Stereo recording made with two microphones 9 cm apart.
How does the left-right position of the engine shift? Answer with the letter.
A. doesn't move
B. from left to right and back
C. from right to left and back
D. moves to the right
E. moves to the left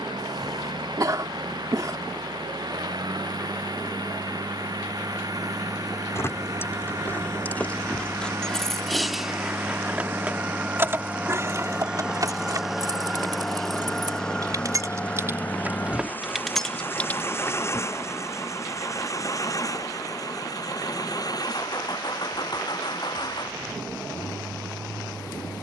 E.